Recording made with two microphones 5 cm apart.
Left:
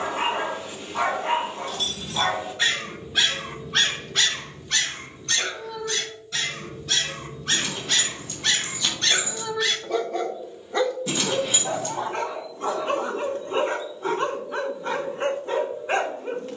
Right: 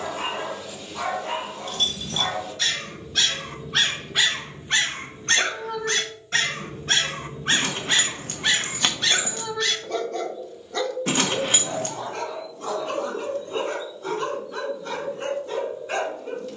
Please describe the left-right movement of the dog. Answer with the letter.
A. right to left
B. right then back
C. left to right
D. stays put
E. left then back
B.